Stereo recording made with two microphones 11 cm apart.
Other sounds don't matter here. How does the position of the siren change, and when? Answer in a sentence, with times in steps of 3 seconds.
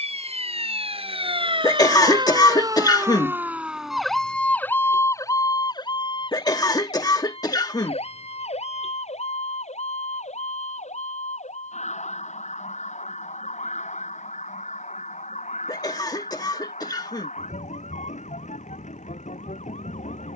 You can hear the siren on the right from 0 s, in the centre from 3 s and on the left from 6 s.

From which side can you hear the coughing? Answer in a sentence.
In this clip you hear the coughing on the left.